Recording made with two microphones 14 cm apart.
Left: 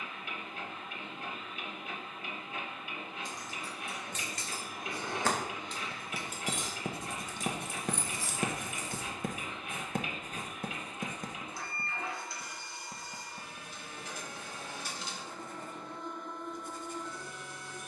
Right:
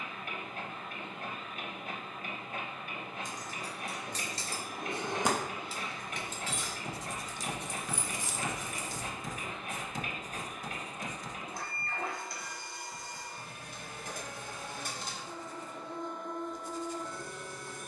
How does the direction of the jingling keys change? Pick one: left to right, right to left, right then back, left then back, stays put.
left then back.